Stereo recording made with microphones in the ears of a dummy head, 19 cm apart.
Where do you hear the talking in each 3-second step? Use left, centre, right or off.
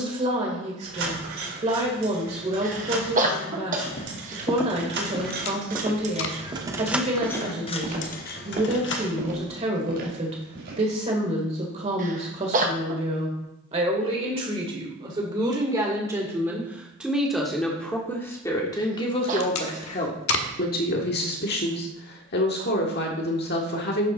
right, right, right, right, right, centre, left, left.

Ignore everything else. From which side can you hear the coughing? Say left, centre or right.
right.